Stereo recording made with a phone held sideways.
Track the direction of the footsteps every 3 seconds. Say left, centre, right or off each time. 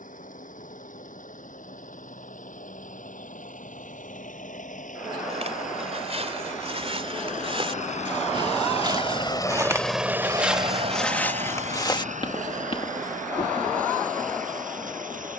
off, right, right, centre, left.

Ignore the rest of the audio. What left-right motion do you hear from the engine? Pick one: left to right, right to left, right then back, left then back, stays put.
left to right.